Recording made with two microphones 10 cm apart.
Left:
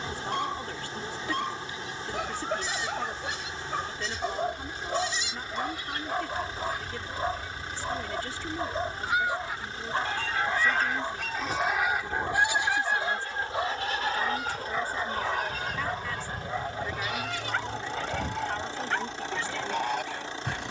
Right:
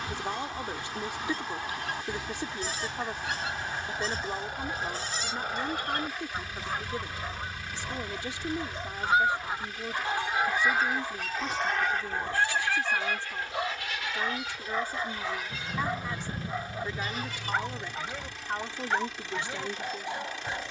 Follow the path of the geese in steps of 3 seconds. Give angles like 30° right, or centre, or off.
70° right, 60° right, 40° right, 10° right, 30° left, 60° left, 70° left.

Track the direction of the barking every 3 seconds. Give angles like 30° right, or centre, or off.
70° left, 60° left, 40° left, 20° left, 10° left, 10° right, 20° right.